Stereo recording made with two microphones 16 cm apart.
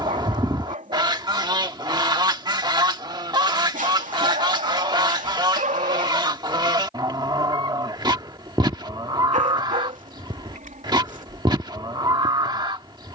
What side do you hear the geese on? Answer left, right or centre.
right.